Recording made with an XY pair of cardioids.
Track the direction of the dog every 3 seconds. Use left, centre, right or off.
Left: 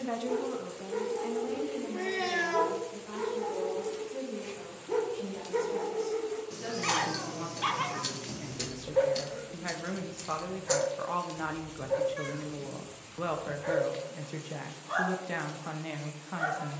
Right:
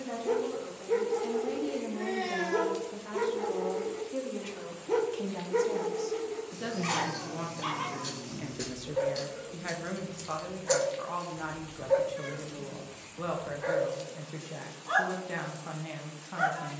right, right, left, centre, right, right.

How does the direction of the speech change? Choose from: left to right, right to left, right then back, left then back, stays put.
right then back.